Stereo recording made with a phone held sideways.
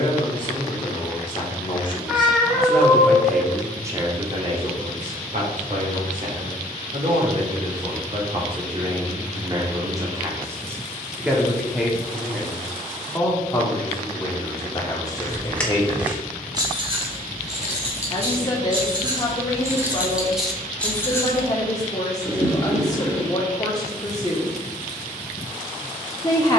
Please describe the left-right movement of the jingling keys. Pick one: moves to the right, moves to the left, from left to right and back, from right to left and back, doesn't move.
from left to right and back.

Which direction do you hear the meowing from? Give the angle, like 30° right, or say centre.
centre.